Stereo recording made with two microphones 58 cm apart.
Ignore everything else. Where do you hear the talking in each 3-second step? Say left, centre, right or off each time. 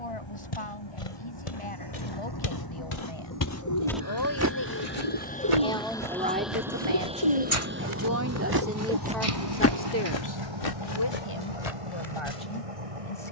left, left, right, left, left.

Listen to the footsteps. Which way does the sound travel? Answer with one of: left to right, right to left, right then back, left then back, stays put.
right then back.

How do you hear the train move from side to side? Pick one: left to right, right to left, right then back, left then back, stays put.
left to right.